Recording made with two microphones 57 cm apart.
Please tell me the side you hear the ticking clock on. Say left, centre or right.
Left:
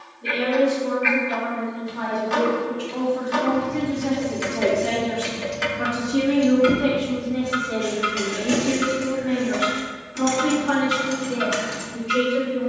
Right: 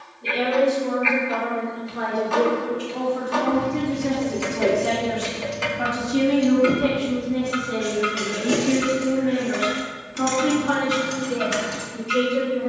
left.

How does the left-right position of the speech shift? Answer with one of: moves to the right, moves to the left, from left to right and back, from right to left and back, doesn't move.
from left to right and back.